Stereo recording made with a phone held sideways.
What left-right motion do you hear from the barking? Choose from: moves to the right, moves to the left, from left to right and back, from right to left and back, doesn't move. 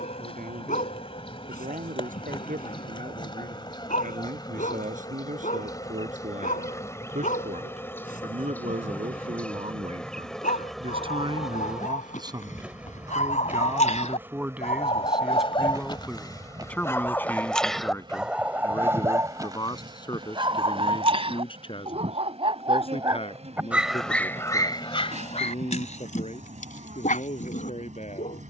from left to right and back.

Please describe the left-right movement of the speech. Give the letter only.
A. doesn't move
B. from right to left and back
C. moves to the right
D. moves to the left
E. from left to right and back
D.